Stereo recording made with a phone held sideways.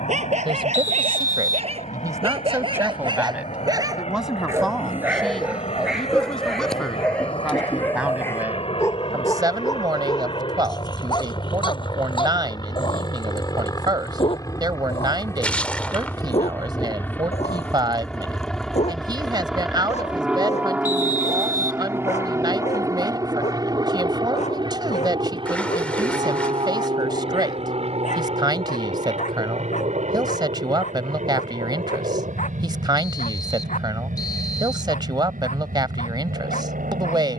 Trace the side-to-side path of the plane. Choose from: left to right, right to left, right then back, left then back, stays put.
left to right.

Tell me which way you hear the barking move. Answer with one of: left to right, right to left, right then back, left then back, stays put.
right to left.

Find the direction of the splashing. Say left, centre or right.
centre.